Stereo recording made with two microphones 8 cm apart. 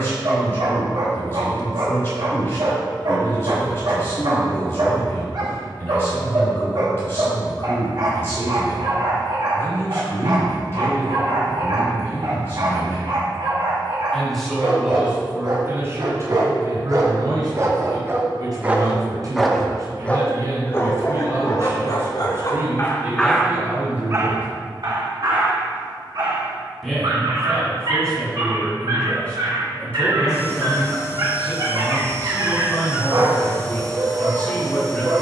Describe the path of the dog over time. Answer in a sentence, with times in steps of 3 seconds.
In this clip you hear the dog on the right from 0 s, in the centre from 18 s, on the left from 21 s and on the right from 24 s.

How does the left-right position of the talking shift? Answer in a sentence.
In this clip you hear the talking go right and come back.